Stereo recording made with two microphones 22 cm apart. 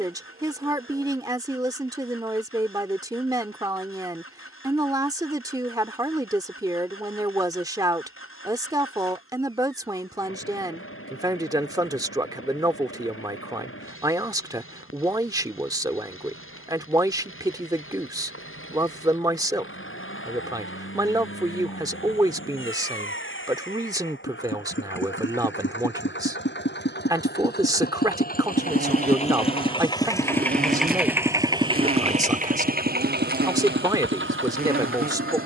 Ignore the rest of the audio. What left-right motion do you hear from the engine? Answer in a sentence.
You can hear the engine go from the left side to the right.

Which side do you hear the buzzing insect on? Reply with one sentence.
You can hear the buzzing insect on the right.